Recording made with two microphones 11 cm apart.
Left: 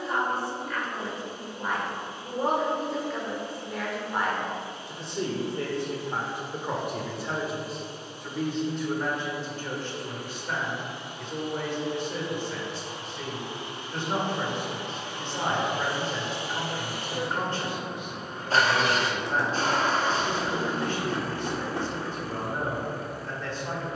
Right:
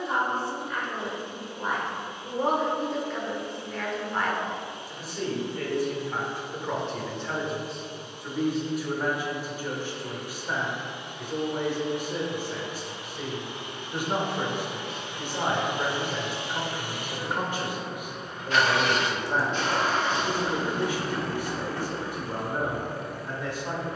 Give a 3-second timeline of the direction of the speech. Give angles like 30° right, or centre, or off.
10° right, 20° left, centre, 10° right, 10° right, 10° right, 10° right, 10° right.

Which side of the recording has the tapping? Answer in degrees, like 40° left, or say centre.
20° left.